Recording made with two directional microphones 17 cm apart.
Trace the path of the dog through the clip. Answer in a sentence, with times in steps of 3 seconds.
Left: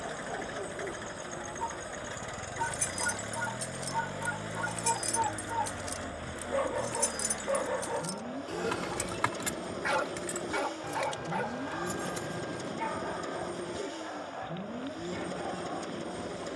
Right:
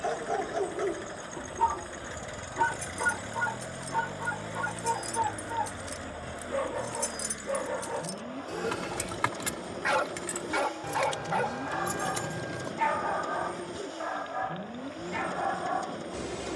You can hear the dog on the right from 0 s, in the centre from 6 s and on the right from 9 s.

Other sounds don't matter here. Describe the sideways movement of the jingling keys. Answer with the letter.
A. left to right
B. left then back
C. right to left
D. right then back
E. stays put
A.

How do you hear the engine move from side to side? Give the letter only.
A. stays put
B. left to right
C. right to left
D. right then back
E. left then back
A.